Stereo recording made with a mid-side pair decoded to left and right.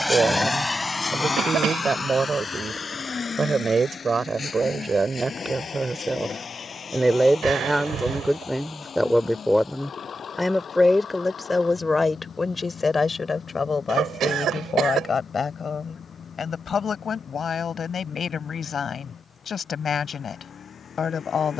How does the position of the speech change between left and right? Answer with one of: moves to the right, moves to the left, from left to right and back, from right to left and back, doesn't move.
moves to the left.